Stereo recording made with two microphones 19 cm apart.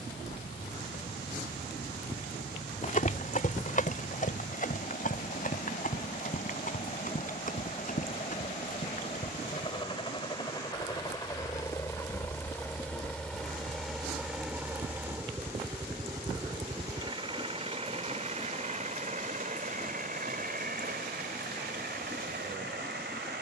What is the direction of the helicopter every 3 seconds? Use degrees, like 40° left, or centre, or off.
50° left, 50° left, 40° left, 20° left, centre, 20° right, 40° right, 60° right.